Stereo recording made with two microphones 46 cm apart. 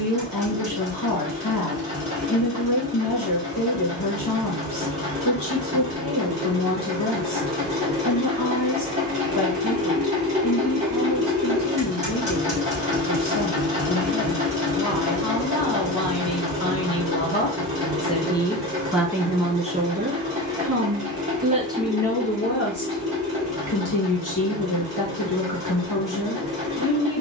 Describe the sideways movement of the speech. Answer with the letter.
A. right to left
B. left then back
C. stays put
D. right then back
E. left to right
D.